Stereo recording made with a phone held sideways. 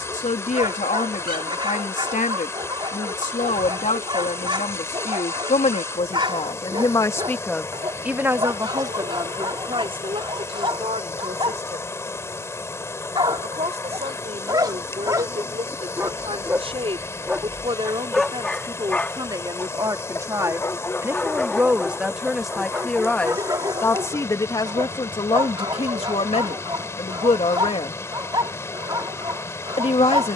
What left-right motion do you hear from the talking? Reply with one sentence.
In this clip you hear the talking move from left to right and back again.